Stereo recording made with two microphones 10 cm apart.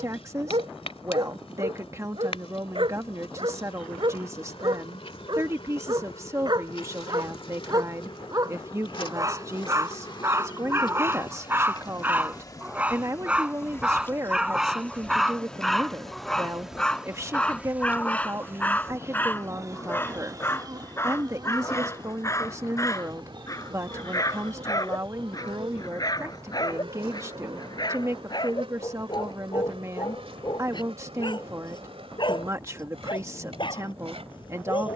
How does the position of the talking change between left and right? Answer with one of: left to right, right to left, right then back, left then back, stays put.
stays put.